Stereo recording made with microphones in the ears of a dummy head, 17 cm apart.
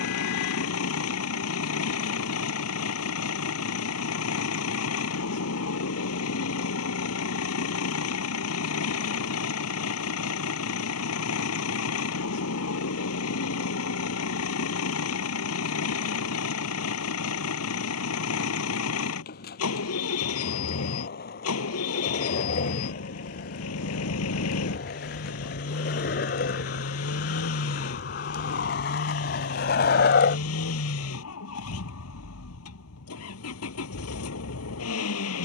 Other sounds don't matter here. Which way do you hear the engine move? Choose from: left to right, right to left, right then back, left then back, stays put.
stays put.